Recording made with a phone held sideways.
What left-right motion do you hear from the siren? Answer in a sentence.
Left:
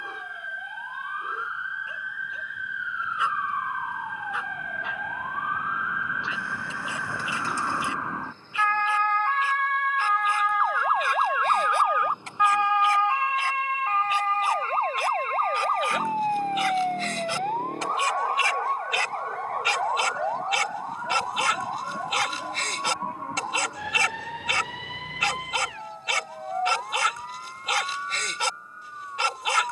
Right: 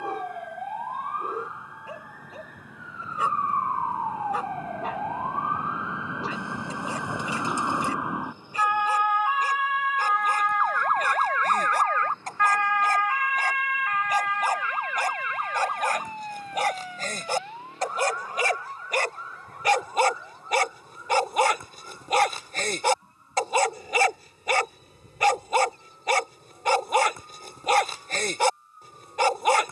You can hear the siren go from the right side to the left.